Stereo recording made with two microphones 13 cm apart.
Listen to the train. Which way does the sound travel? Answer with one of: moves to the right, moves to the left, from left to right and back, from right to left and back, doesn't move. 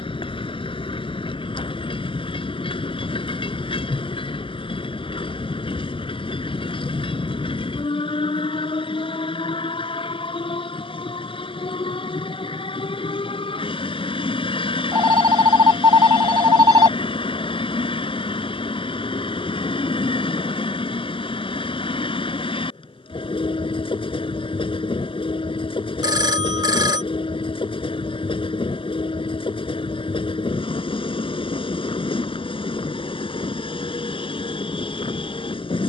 doesn't move.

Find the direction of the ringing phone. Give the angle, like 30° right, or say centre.
30° right.